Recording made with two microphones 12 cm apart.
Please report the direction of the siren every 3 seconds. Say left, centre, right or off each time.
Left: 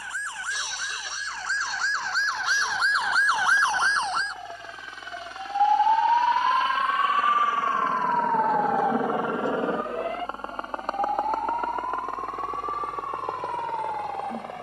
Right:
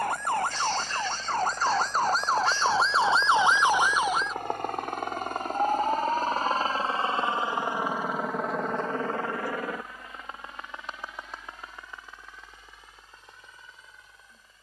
right, centre, left, left, left.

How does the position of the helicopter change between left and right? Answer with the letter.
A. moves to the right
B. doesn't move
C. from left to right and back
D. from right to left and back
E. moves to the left
E.